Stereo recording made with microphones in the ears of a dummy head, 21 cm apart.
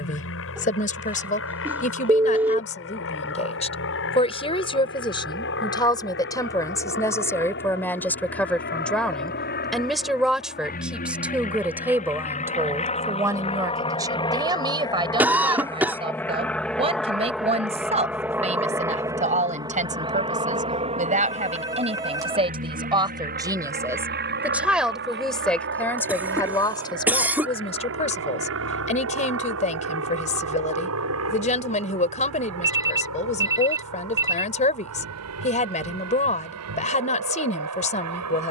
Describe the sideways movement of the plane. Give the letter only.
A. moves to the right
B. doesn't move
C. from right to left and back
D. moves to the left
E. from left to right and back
A.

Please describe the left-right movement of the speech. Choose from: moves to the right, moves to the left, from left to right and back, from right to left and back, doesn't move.
from left to right and back.